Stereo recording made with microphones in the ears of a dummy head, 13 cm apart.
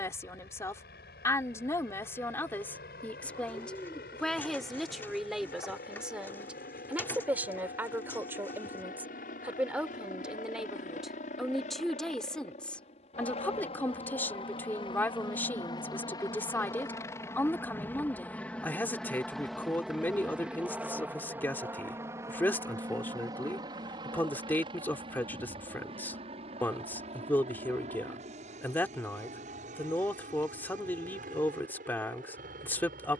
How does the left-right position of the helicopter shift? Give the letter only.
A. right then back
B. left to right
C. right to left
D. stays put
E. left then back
B.